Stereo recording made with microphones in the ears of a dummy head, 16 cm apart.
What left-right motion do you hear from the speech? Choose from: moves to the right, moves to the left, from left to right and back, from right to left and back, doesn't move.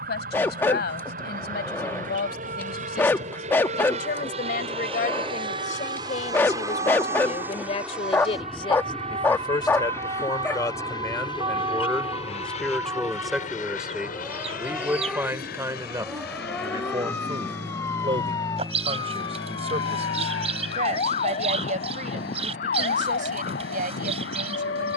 moves to the right.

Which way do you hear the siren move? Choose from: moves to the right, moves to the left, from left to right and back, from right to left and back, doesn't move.
moves to the left.